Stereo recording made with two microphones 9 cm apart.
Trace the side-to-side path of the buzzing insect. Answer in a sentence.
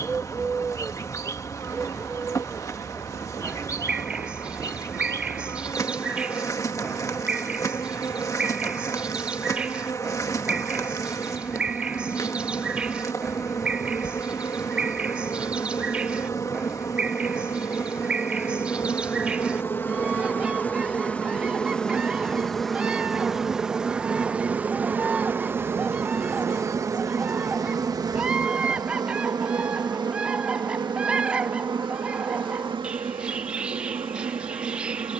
In this clip you hear the buzzing insect move from left to right.